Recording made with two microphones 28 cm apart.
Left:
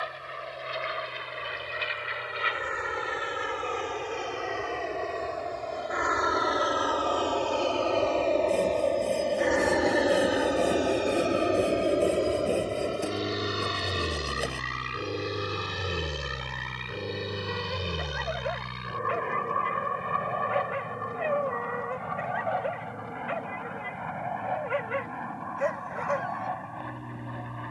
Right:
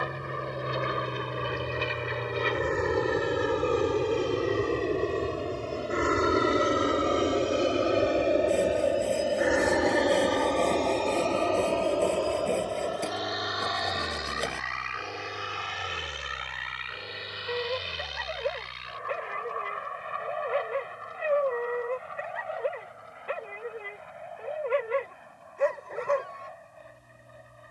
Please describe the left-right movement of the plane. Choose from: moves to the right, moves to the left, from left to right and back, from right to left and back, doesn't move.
moves to the left.